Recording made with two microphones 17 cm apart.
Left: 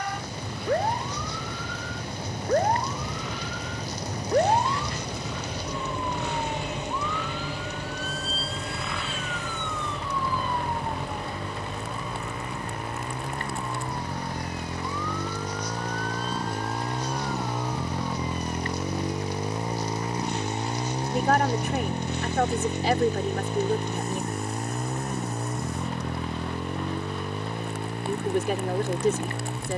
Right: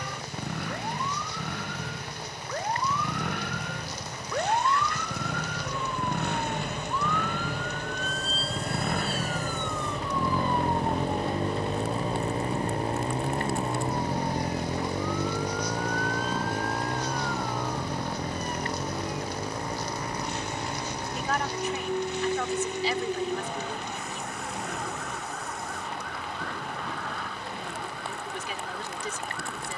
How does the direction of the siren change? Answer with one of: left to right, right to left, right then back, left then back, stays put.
left to right.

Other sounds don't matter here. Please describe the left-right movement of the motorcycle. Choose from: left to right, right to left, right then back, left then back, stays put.
right to left.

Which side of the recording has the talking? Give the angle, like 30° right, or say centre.
50° left.